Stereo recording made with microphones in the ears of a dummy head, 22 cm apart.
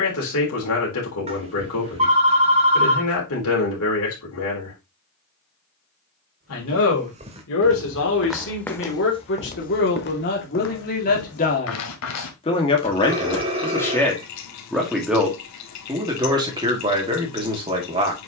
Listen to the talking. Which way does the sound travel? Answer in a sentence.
You can hear the talking move to the right.